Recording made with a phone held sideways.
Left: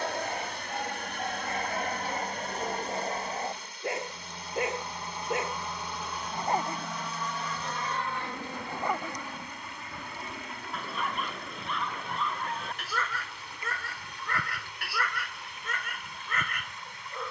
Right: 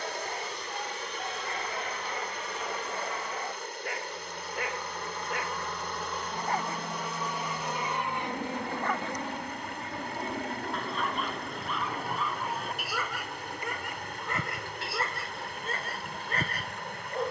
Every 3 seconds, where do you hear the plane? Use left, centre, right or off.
left, left, centre, right, right, right.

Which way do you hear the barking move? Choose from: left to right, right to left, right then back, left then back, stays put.
left to right.